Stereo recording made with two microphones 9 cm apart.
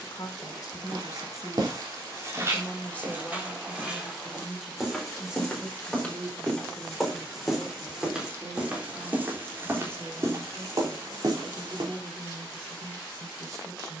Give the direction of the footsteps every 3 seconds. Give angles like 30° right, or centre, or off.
40° right, 10° right, centre, 40° right, off.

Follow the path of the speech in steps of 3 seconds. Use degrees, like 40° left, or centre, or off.
30° left, centre, 20° right, 30° right, 40° right.